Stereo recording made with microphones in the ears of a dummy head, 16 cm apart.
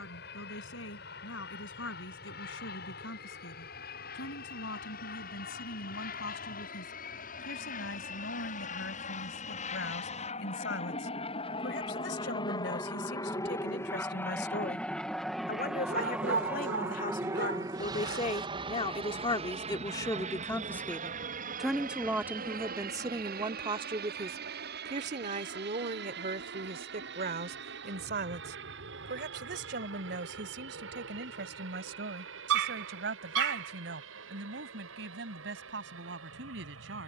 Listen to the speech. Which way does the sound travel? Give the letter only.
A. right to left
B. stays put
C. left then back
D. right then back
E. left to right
E.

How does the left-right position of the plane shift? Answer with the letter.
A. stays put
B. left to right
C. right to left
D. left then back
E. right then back
B.